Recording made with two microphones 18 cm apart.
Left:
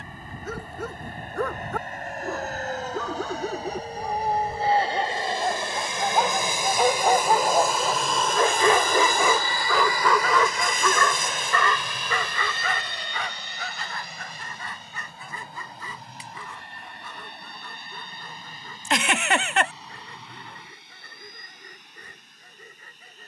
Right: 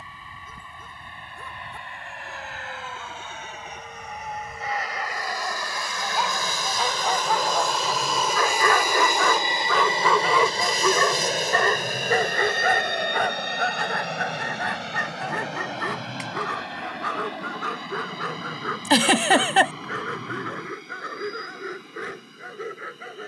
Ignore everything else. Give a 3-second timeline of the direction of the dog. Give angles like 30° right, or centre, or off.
70° left, 60° left, 40° left, 10° right, 50° right, 70° right, 70° right, 80° right.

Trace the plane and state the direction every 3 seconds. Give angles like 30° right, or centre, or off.
50° left, 30° left, 10° left, 30° right, 50° right, 70° right, 70° right, 80° right.